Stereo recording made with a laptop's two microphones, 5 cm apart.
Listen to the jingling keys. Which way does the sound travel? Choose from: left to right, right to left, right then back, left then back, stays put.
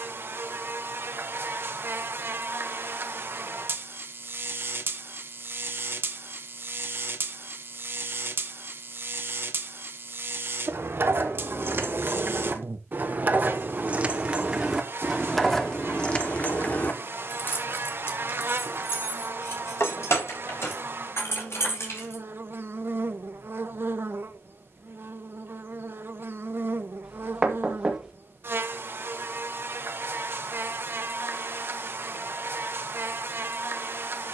right to left.